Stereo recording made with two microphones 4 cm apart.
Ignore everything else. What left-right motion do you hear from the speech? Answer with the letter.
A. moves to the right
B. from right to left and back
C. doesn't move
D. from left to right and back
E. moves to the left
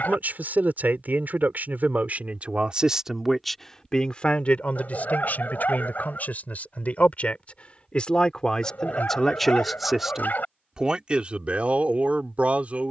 B.